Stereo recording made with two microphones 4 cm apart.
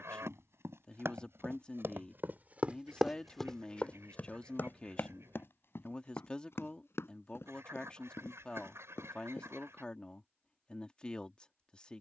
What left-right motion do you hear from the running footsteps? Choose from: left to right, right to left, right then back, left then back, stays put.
right to left.